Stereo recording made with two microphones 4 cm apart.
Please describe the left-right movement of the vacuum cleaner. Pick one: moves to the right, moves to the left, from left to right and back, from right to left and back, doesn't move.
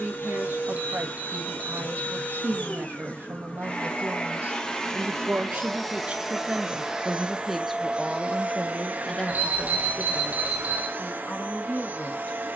moves to the right.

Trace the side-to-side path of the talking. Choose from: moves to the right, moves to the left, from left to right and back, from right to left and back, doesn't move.
moves to the left.